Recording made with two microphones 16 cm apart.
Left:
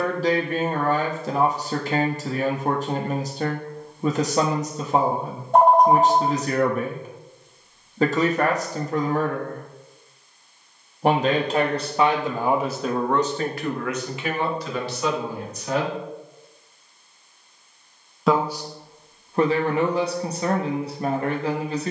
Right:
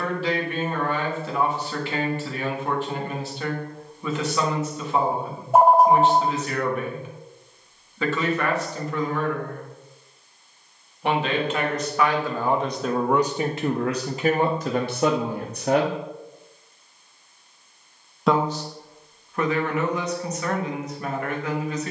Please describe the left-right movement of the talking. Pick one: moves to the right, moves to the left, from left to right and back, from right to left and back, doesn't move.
from left to right and back.